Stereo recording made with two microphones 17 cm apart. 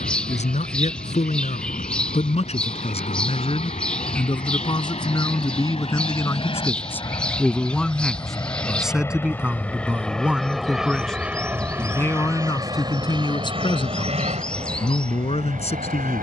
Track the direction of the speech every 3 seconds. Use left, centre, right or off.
left, left, centre, centre, left, left.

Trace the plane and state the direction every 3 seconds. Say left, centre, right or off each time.
left, left, left, centre, right, right.